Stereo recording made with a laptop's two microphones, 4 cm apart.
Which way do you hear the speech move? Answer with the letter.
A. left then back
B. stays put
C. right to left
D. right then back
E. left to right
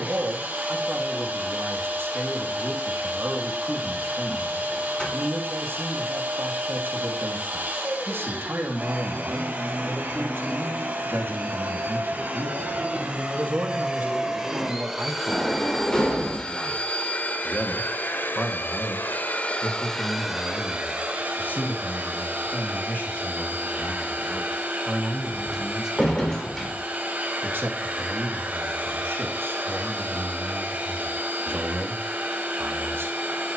A.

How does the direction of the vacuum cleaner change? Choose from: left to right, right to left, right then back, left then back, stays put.
left then back.